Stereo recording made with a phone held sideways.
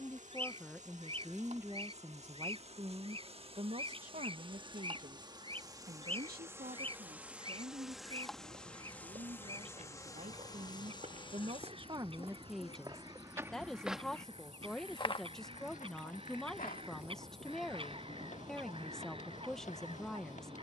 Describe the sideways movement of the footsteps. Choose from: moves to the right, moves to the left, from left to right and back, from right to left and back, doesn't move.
moves to the left.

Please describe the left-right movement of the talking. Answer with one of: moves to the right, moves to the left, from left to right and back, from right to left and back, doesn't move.
from left to right and back.